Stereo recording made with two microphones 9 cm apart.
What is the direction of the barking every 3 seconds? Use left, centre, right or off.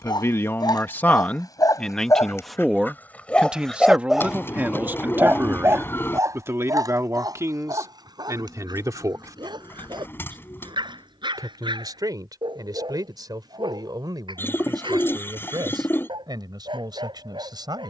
left, centre, right, right, right, right.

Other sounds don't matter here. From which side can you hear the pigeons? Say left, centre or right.
left.